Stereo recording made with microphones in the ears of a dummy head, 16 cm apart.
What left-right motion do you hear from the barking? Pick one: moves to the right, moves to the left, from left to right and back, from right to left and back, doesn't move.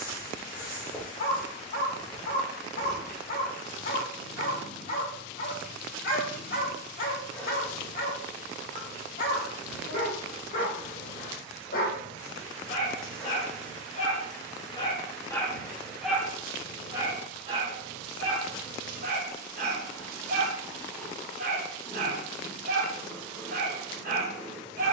moves to the right.